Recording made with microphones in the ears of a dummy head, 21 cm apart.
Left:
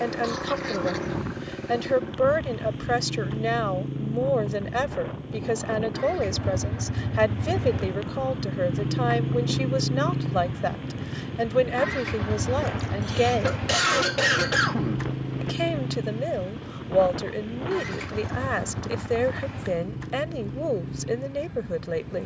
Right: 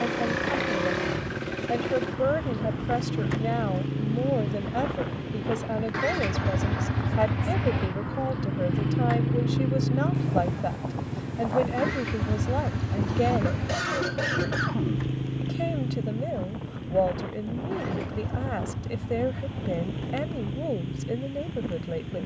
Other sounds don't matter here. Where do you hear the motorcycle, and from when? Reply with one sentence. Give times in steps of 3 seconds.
In this clip you hear the motorcycle on the right from 0 s, in the centre from 9 s and on the left from 12 s.